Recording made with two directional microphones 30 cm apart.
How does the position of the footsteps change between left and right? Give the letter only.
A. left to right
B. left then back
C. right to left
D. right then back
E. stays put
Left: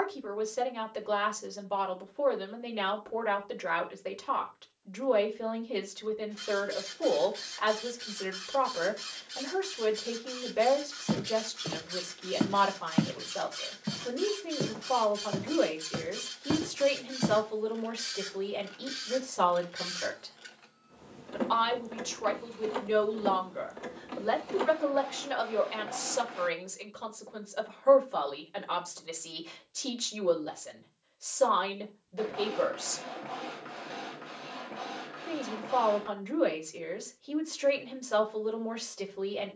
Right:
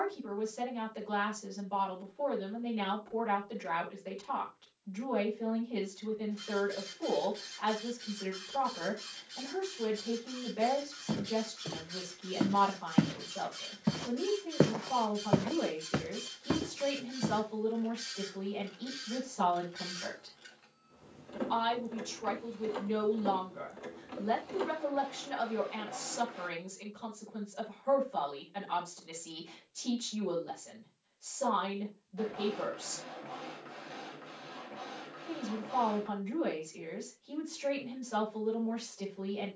D.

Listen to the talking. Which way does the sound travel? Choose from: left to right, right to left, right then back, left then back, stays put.
stays put.